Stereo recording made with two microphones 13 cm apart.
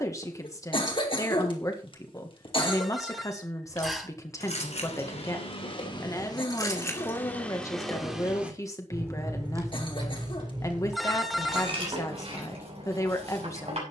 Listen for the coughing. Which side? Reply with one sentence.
You can hear the coughing on the left.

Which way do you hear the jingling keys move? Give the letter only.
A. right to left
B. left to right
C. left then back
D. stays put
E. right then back
B.